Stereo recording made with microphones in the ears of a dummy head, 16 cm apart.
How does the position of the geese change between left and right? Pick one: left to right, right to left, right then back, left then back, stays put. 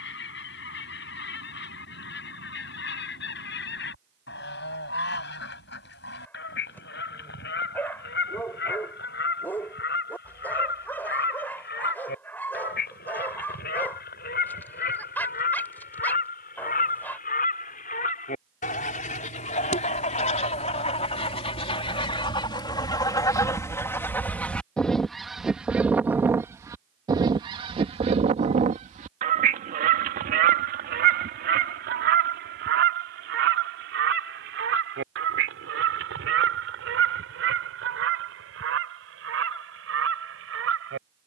left to right.